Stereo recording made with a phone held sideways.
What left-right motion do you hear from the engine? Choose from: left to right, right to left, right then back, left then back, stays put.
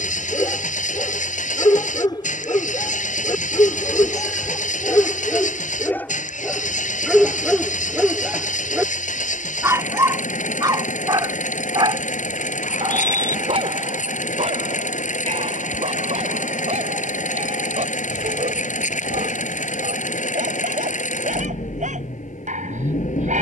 stays put.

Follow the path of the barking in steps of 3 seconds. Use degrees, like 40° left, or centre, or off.
30° left, 20° left, centre, 30° right, 50° right, 60° right, 70° right, 70° right.